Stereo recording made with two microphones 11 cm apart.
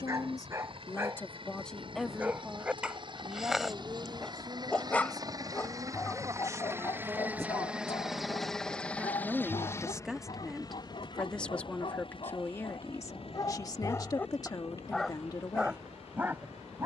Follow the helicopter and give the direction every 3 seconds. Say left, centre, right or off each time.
right, right, centre, left, left, left.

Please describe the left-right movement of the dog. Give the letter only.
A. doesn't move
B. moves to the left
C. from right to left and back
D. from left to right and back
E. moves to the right
C.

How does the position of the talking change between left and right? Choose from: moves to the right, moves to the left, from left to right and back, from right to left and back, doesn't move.
from left to right and back.